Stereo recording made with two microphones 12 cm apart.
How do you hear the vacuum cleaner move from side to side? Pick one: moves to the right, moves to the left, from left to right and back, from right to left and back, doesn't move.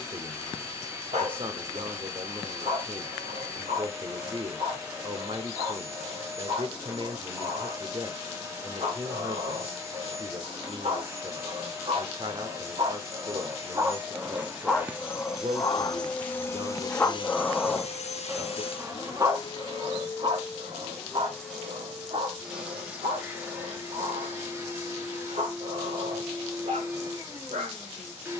from right to left and back.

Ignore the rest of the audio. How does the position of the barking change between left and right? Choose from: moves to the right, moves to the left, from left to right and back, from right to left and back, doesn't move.
from right to left and back.